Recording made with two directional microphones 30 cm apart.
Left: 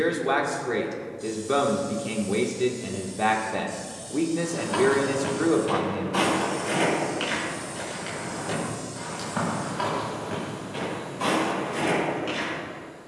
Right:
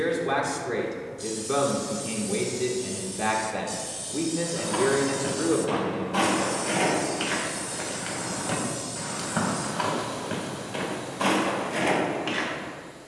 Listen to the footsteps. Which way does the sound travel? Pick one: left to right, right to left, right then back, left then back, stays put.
left to right.